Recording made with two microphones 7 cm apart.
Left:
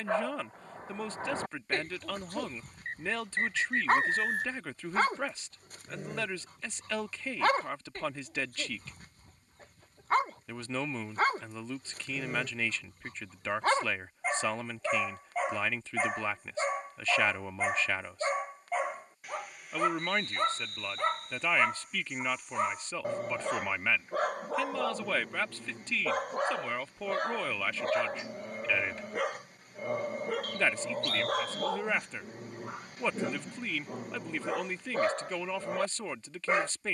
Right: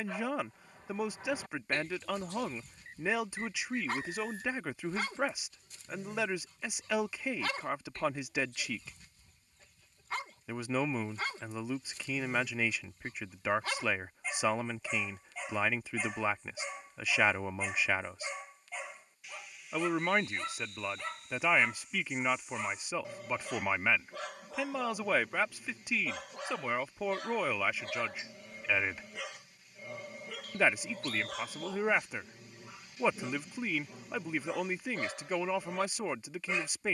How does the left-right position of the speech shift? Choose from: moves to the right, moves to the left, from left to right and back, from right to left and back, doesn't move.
doesn't move.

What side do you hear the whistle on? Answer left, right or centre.
left.